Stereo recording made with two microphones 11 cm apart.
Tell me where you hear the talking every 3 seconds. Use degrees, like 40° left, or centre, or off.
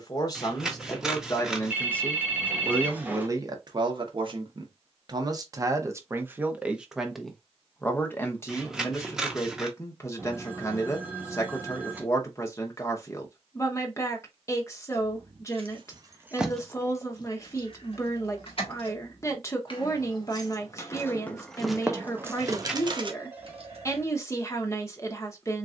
20° left, 40° right, 10° left, 30° left, 30° left, 30° left, 30° left, 30° left, 30° left.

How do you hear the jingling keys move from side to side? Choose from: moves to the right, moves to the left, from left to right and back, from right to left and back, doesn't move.
from right to left and back.